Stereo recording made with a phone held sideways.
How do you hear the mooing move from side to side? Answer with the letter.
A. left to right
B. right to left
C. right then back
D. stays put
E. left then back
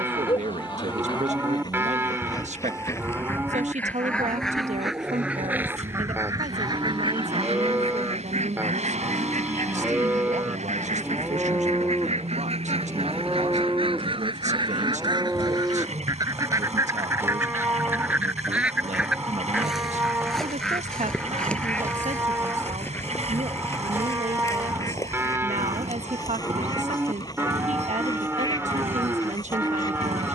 D.